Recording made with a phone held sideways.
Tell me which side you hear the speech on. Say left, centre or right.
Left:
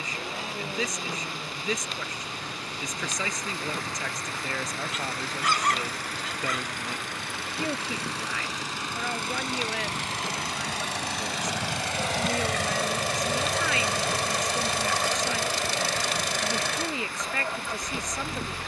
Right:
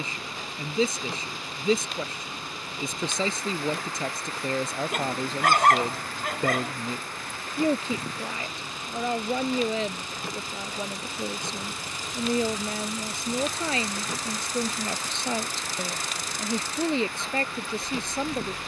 right.